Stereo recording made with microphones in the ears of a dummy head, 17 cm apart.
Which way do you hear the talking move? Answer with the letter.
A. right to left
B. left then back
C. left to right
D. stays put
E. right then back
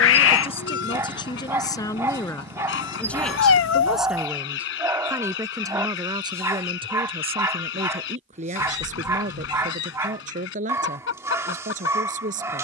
C.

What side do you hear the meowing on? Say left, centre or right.
left.